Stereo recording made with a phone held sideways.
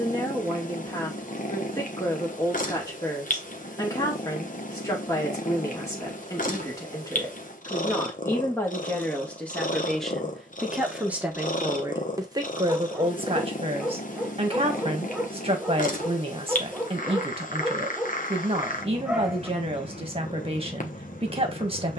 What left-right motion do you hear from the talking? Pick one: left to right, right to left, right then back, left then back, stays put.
left to right.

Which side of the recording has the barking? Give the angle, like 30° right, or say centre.
centre.